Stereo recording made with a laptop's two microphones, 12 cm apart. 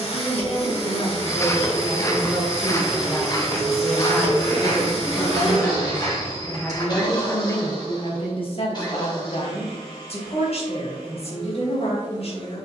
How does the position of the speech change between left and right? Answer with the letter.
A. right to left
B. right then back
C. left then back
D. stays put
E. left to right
B.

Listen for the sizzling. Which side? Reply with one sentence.
In this clip you hear the sizzling on the left.